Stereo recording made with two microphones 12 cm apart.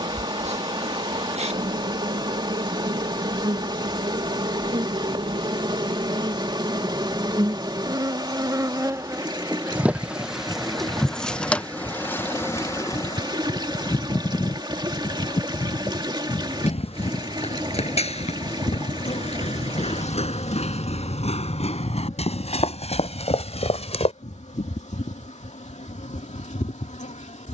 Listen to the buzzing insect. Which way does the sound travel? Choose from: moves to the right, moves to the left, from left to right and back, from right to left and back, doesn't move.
moves to the left.